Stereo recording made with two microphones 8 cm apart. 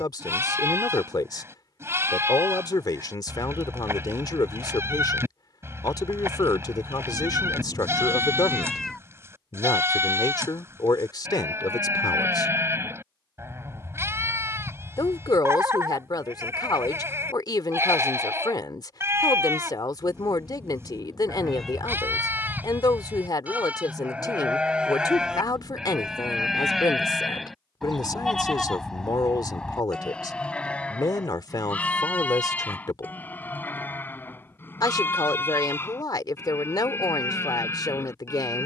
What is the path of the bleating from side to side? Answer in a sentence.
You can hear the bleating travel towards the left.